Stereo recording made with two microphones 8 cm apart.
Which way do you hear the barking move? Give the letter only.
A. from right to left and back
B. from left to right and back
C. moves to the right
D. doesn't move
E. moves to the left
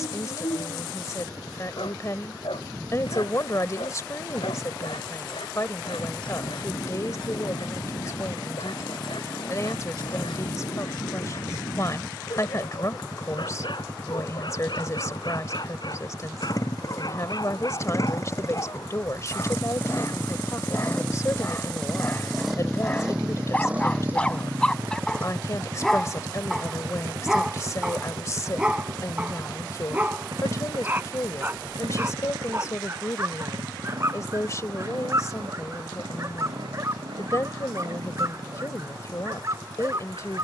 C.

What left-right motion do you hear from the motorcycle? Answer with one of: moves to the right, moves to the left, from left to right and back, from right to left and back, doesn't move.
moves to the right.